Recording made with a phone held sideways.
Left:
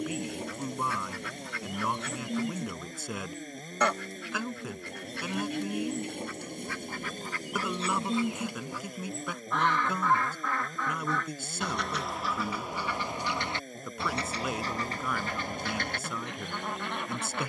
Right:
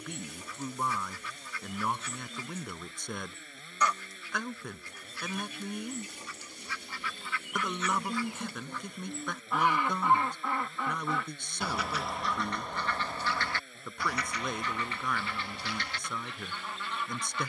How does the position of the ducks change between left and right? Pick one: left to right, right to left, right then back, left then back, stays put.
right then back.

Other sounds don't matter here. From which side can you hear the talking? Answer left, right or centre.
centre.